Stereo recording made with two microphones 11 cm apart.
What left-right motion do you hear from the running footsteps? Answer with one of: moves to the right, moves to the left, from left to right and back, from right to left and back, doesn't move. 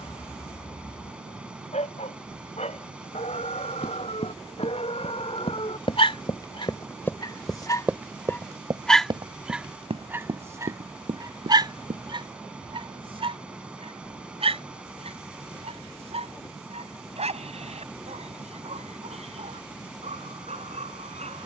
moves to the right.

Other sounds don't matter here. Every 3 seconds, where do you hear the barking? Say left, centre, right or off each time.
left, left, left, right, right, right, right.